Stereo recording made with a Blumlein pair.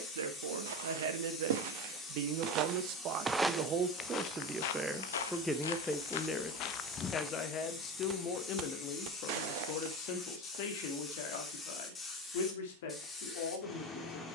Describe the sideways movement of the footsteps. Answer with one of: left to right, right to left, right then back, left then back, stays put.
left then back.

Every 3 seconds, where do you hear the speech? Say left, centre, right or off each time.
right, centre, left, left, left.